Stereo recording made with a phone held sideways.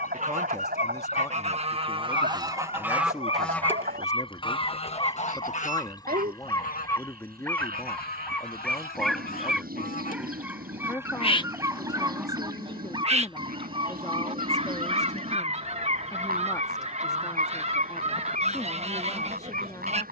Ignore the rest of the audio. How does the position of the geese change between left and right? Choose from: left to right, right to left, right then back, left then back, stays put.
left then back.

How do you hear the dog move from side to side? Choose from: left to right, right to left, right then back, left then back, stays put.
left to right.